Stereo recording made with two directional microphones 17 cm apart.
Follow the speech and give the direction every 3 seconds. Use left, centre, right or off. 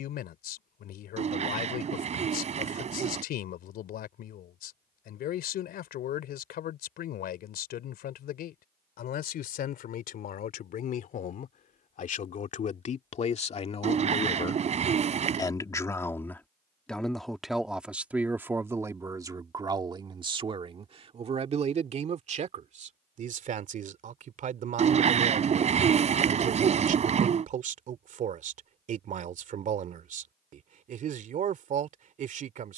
left, left, left, left, left, centre, right, right, right, right, right.